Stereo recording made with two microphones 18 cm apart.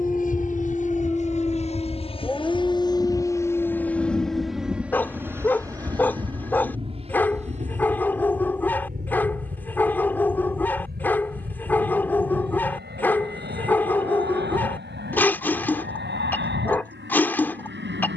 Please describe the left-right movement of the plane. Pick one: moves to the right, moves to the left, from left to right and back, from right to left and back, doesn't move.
moves to the right.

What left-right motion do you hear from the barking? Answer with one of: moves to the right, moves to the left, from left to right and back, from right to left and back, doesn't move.
doesn't move.